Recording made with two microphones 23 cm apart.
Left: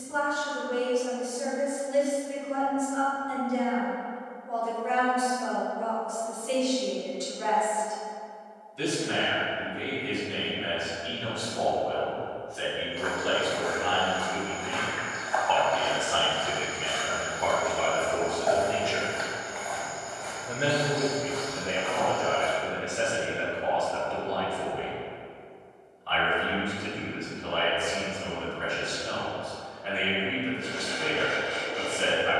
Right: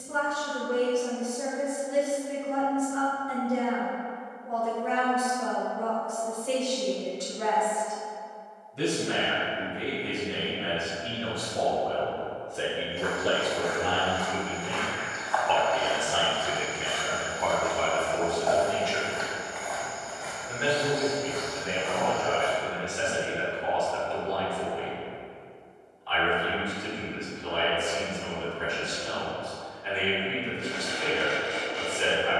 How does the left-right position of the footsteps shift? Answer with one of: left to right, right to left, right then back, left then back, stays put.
left then back.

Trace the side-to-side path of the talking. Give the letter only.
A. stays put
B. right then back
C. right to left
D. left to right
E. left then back
C.